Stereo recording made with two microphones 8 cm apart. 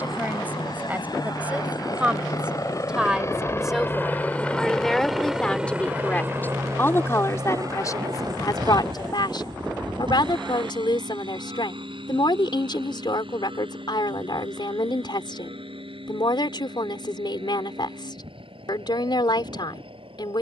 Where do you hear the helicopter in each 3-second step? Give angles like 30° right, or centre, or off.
60° left, 10° left, 40° right, 60° right, 70° right, 70° right, 80° right.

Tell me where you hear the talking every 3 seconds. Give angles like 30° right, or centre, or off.
20° right, centre, 40° left, 60° left, 60° left, 60° left, 60° left.